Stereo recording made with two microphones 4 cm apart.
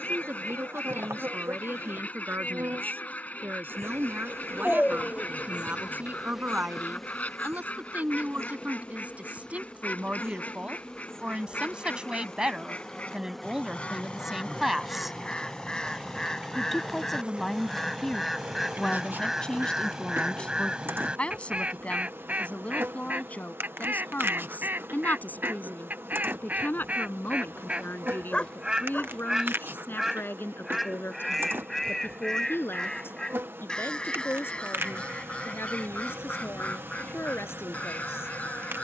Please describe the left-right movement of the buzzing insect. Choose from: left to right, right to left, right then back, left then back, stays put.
left then back.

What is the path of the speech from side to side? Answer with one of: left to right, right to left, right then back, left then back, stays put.
right to left.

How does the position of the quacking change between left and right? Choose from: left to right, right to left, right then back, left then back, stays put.
right then back.